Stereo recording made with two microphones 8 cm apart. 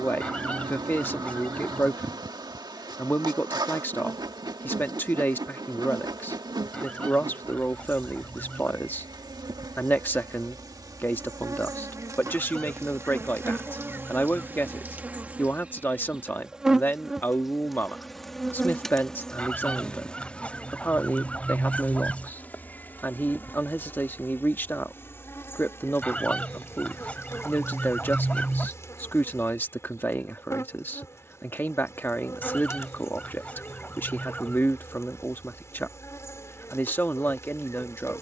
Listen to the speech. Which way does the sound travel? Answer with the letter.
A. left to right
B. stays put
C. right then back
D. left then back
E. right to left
B.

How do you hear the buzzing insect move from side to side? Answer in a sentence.
In this clip you hear the buzzing insect move from right to left.